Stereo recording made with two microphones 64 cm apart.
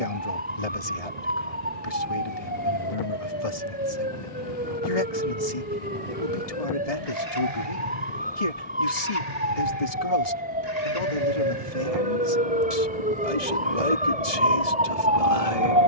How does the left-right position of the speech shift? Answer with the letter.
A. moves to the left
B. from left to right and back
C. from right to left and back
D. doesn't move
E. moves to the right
D.